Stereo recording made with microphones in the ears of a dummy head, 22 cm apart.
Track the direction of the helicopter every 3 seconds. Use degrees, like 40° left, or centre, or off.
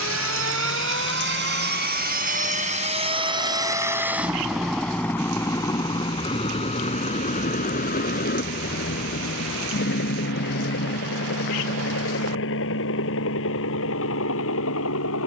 50° right, centre, 30° left, 40° left, 50° left.